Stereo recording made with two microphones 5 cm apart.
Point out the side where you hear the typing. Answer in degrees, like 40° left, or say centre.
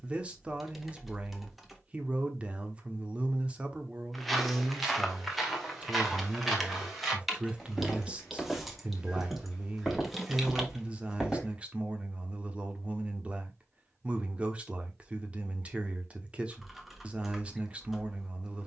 centre.